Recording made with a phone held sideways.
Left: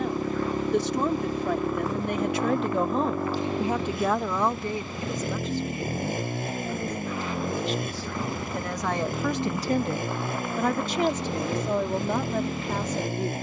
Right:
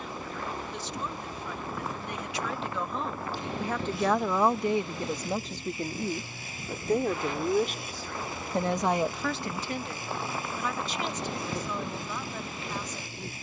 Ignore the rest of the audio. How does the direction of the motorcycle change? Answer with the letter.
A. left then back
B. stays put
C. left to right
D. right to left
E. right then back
B.